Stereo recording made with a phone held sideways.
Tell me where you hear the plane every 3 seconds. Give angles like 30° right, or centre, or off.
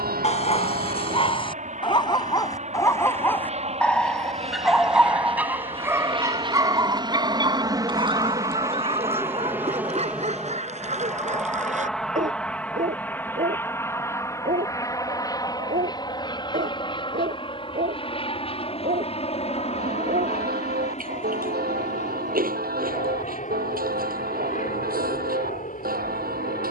50° right, 40° right, 30° right, 10° right, 10° left, 30° left, 40° left, 50° left, 50° left.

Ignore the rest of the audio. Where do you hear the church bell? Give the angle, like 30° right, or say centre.
80° right.